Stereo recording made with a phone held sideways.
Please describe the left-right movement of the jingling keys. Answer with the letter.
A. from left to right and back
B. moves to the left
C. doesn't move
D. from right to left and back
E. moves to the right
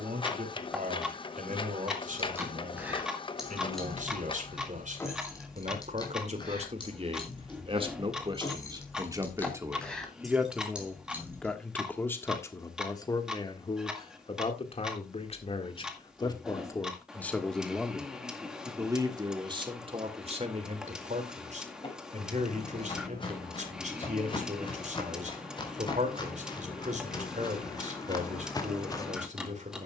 D.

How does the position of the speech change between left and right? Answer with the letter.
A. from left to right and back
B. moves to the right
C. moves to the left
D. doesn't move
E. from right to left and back
E.